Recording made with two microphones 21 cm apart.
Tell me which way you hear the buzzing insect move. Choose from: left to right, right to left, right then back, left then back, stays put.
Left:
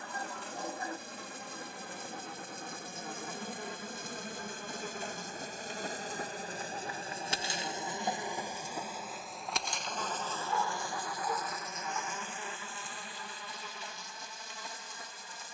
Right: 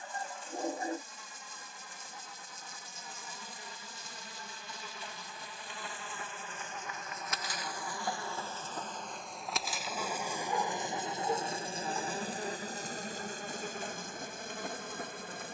left to right.